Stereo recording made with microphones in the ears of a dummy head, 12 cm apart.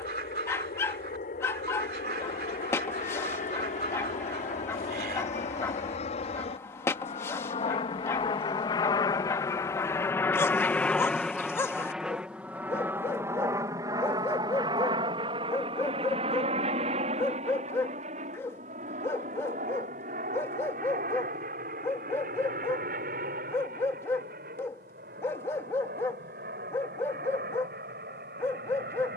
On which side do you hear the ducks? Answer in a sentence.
In this clip you hear the ducks on the right.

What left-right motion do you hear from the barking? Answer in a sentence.
You can hear the barking stay put.